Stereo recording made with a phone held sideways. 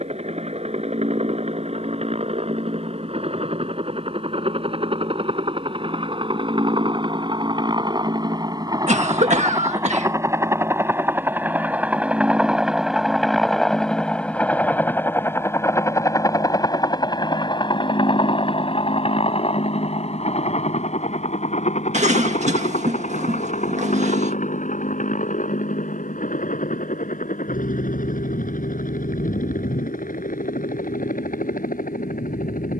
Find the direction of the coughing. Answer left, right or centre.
right.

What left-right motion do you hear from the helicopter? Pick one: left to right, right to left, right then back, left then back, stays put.
right to left.